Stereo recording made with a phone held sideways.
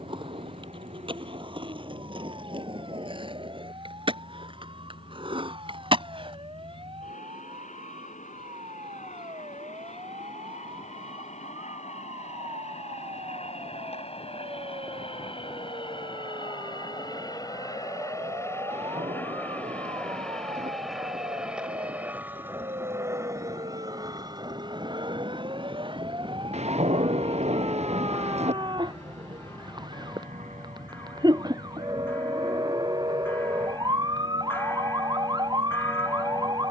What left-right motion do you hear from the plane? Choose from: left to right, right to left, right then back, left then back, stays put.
left to right.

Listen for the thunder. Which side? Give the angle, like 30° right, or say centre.
50° right.